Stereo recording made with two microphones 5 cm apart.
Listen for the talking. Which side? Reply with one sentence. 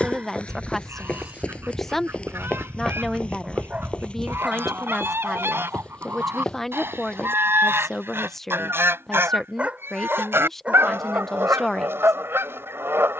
In this clip you hear the talking in the centre.